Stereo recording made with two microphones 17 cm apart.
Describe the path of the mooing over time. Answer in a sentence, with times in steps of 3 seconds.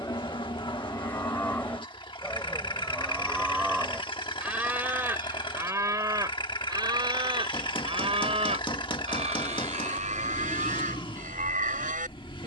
You can hear the mooing in the centre from 0 s and on the right from 6 s.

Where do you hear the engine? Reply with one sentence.
In this clip you hear the engine on the left.